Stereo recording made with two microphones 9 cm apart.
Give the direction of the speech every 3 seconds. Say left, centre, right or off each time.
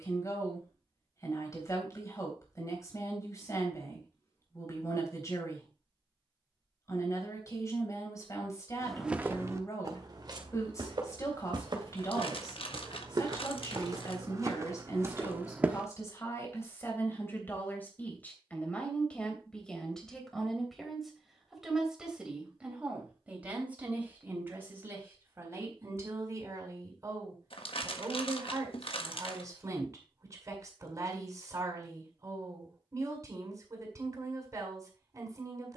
left, left, left, left, left, left, centre, centre, right, right, right, right.